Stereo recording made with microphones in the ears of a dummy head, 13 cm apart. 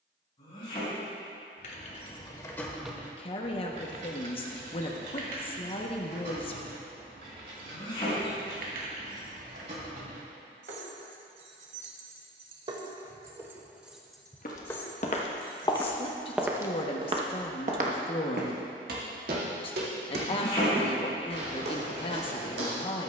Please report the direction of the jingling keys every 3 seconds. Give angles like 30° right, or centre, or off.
30° left, 60° right, 70° right, 60° right, 20° right, 30° left, off, off.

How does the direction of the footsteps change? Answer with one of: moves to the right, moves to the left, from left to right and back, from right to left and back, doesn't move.
moves to the right.